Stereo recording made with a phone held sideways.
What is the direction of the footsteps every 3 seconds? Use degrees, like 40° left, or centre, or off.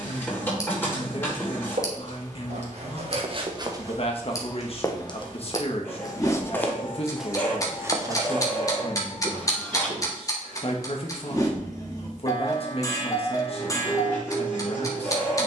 60° right, 10° right, centre, 50° right, off.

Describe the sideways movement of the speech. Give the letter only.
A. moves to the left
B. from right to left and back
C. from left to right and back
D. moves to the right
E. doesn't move
E.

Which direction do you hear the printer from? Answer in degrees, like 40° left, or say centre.
20° left.